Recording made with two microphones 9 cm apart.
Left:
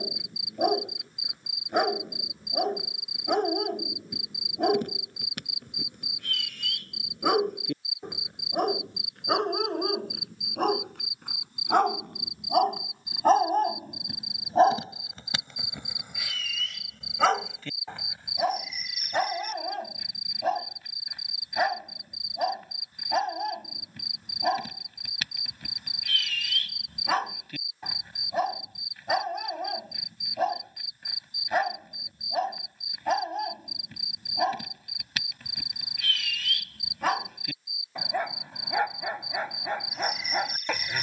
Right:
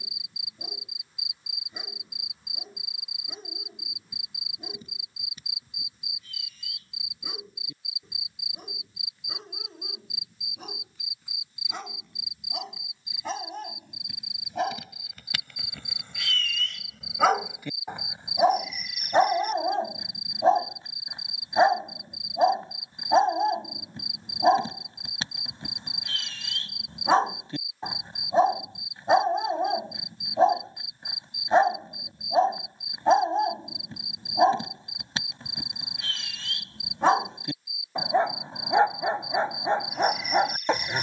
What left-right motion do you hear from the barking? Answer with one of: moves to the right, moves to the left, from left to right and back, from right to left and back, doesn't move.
moves to the right.